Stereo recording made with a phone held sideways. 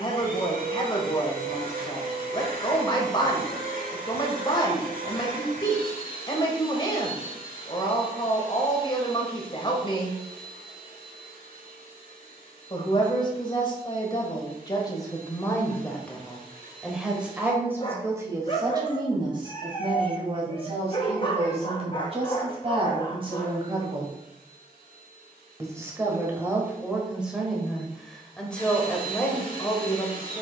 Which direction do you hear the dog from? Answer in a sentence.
You can hear the dog on the left.